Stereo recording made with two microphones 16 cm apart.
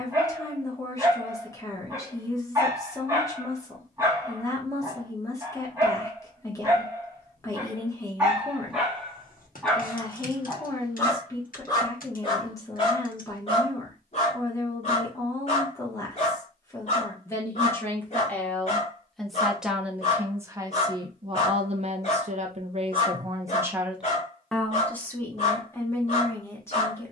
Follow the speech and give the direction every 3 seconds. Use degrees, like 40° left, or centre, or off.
20° left, 20° left, 20° left, 20° left, 20° left, 20° left, centre, 30° right, 10° left.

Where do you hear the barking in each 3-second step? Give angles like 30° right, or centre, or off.
20° right, 20° right, 10° right, 10° left, 40° left, 50° left, 50° left, 50° left, 50° left.